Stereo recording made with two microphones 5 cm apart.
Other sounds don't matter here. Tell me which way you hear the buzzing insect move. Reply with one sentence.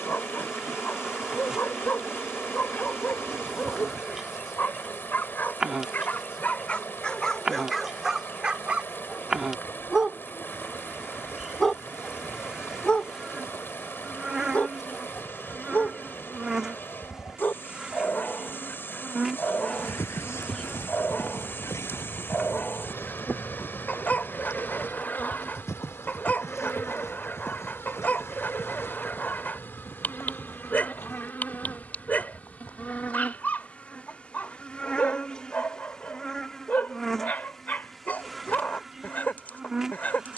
You can hear the buzzing insect move from right to left and back again.